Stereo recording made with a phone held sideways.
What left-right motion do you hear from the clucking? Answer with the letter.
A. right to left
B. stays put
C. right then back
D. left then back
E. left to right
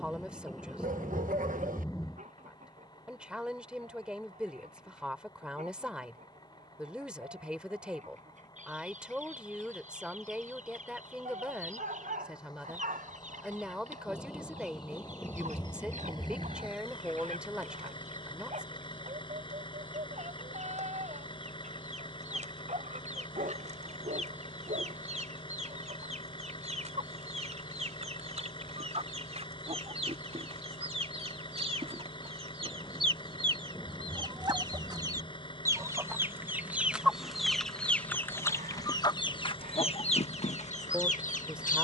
A.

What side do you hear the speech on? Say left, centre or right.
centre.